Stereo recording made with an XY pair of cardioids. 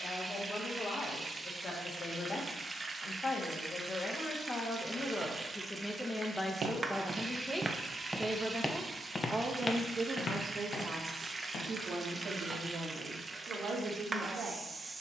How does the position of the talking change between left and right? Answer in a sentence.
In this clip you hear the talking travel towards the right.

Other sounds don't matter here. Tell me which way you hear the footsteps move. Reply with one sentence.
You can hear the footsteps move to the left.